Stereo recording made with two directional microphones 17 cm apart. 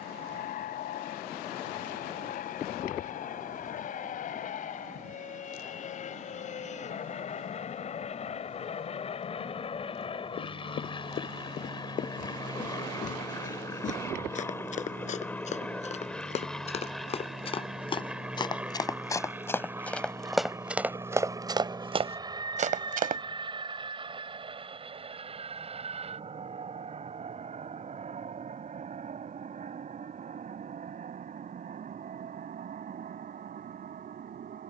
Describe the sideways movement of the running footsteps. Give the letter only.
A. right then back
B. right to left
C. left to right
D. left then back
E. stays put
C.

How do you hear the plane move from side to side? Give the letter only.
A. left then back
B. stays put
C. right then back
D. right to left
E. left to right
E.